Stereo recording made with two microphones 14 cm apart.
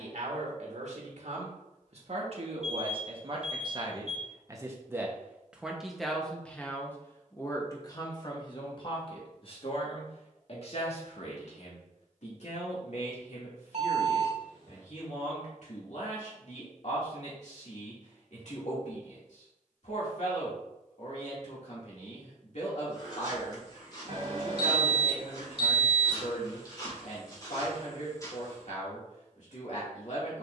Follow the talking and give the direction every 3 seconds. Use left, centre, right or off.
right, right, left, left, left, left, left, left, left, left.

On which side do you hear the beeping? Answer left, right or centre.
right.